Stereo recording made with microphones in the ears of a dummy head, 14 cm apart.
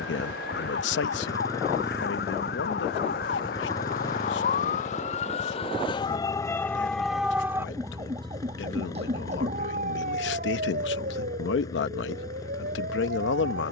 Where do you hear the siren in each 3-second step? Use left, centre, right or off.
left, left, centre, right, right.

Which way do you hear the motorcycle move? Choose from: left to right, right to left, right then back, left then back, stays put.
stays put.